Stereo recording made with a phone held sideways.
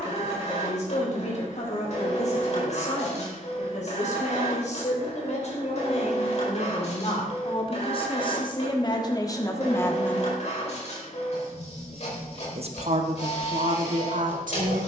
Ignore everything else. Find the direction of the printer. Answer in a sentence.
You can hear the printer on the left.